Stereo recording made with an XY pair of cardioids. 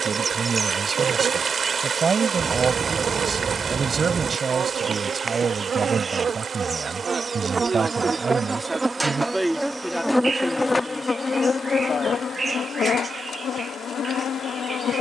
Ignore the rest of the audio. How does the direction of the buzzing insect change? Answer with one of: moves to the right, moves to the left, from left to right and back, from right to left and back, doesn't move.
moves to the left.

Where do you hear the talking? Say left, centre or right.
right.